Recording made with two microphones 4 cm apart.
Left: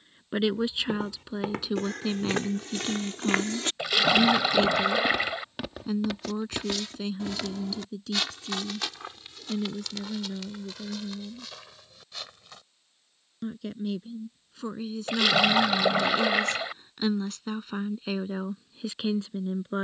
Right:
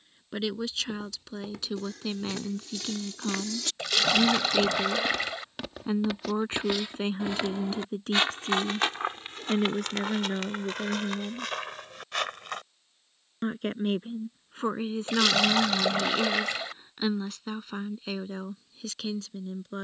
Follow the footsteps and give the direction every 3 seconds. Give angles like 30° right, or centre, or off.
60° left, 20° left, 30° right, 50° right, 60° right, off, off.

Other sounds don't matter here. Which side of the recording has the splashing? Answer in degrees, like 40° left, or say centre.
10° left.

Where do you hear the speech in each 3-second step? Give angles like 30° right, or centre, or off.
10° left, 10° right, 40° right, 50° right, 40° right, 10° right, 20° left.